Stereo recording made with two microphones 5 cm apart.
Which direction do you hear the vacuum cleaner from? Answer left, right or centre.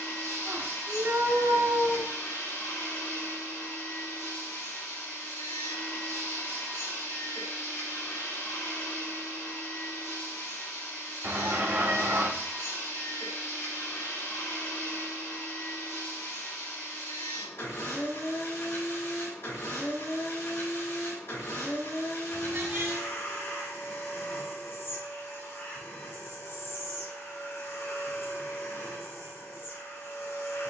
left.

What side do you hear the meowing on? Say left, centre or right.
right.